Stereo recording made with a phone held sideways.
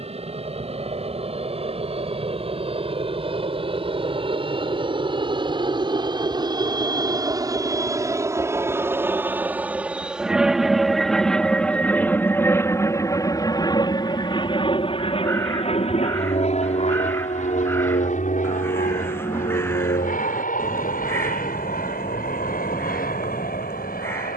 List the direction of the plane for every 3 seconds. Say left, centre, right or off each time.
right, right, right, centre, left, left, left, left.